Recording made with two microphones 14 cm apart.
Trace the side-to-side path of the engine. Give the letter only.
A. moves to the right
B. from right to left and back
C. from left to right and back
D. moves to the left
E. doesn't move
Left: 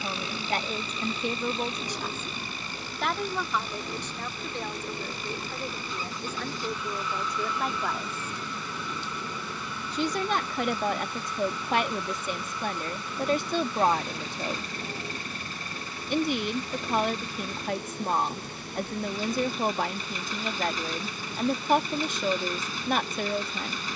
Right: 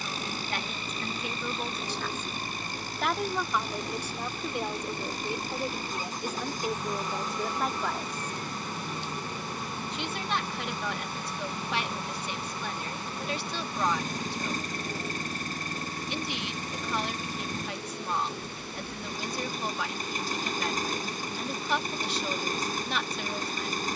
E.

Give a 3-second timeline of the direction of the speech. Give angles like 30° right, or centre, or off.
30° left, 10° right, 10° right, 40° left, 50° left, 50° left, 50° left, 50° left.